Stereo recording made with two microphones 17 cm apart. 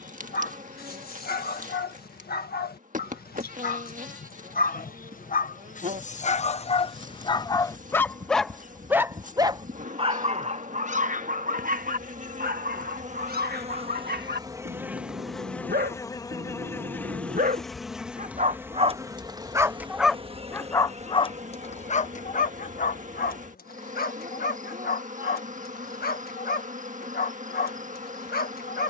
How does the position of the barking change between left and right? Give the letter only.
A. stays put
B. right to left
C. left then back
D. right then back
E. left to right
D.